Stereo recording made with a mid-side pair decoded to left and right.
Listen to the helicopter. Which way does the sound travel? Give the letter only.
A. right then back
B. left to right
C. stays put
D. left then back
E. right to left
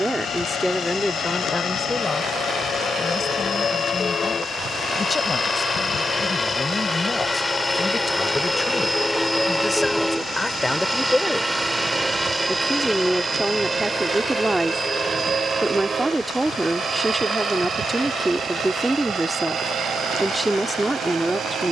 B.